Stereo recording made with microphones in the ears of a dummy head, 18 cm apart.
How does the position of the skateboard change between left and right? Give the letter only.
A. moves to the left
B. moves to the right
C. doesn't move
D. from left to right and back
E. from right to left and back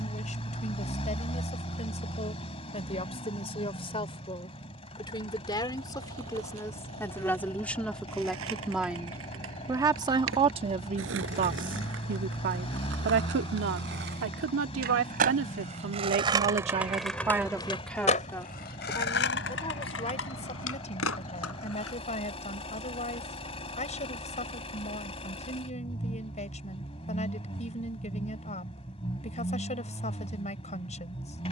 A.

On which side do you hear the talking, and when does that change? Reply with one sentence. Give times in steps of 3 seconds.
In this clip you hear the talking on the left from 0 s, in the centre from 6 s, on the right from 9 s and on the left from 18 s.